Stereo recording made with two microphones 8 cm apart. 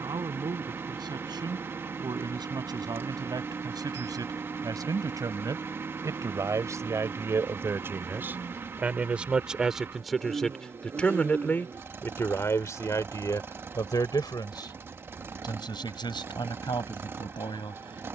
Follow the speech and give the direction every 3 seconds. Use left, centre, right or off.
right, right, right, centre, left, left.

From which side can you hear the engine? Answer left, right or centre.
right.